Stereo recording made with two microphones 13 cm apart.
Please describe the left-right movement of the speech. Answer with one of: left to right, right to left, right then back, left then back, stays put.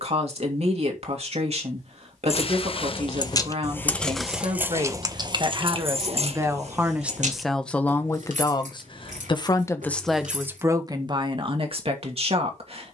left then back.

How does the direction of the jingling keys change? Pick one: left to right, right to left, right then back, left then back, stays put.
left to right.